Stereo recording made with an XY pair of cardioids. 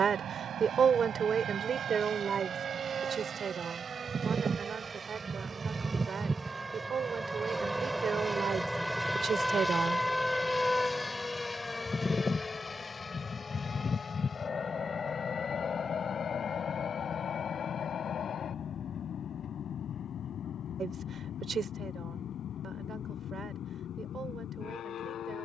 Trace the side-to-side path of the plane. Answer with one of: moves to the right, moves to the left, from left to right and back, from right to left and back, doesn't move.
moves to the left.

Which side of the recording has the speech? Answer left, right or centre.
right.